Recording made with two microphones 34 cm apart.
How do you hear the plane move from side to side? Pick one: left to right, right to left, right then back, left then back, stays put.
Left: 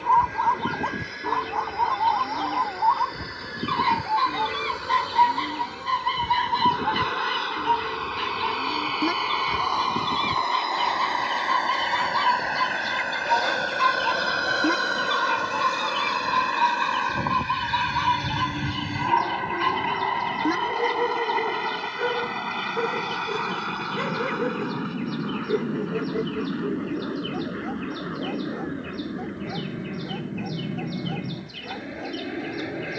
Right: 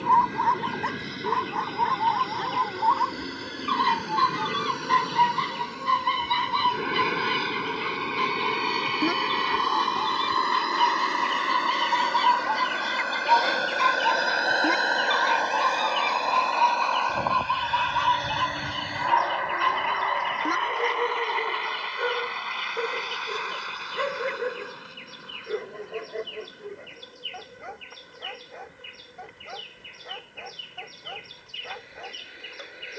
right to left.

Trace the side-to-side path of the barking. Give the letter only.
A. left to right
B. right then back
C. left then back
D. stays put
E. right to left
E.